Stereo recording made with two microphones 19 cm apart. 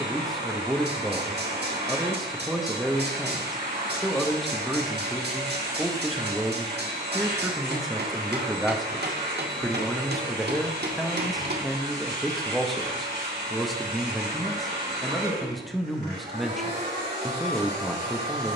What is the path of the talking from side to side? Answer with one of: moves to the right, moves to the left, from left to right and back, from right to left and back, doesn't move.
doesn't move.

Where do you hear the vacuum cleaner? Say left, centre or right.
right.